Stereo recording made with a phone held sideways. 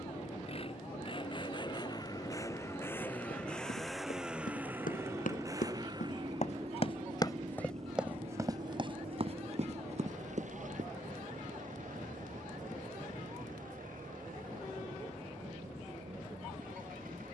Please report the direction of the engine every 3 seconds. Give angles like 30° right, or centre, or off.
30° left, 10° right, 40° right, 60° right, 70° right, 70° right.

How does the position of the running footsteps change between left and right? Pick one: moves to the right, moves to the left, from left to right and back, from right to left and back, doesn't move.
moves to the right.